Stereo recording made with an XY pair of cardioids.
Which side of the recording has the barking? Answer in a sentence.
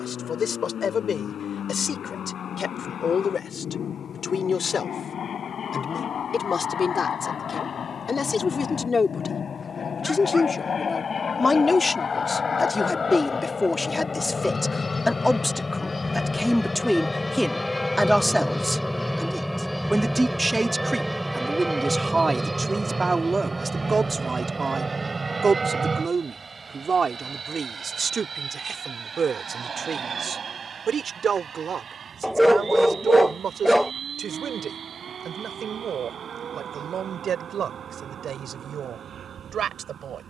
In this clip you hear the barking in the centre.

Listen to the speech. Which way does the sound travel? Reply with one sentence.
In this clip you hear the speech travel towards the right.